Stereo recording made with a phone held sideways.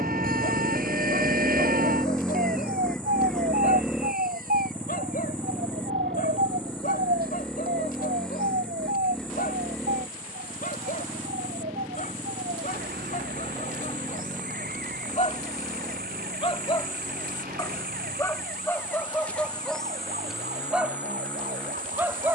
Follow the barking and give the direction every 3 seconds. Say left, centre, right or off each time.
left, left, left, left, left, left, centre, centre.